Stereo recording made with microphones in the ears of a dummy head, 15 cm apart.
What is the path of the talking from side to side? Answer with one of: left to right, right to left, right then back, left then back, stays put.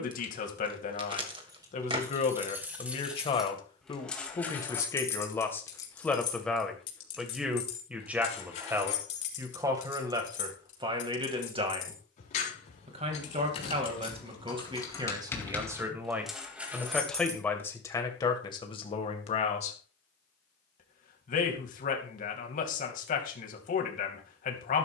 right then back.